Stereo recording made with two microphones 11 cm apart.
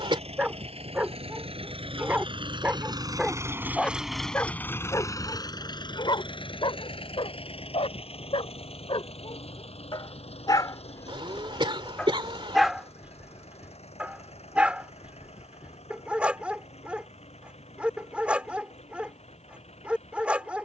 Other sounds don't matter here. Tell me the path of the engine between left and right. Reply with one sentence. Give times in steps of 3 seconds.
In this clip you hear the engine on the right from 0 s, in the centre from 3 s and on the left from 6 s.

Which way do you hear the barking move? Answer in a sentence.
You can hear the barking move from right to left and back again.